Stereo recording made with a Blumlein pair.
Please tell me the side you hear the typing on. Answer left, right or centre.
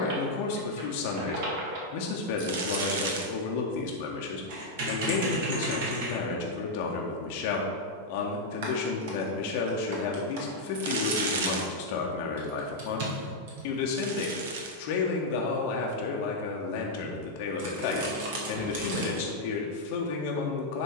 right.